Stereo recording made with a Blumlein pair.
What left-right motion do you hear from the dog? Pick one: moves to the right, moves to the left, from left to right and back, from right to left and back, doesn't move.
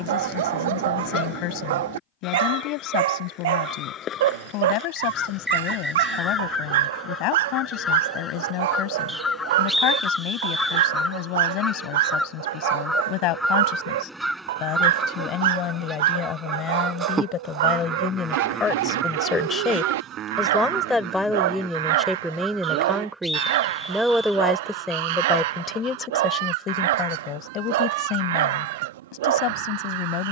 doesn't move.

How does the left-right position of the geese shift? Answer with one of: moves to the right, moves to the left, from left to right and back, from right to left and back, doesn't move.
moves to the right.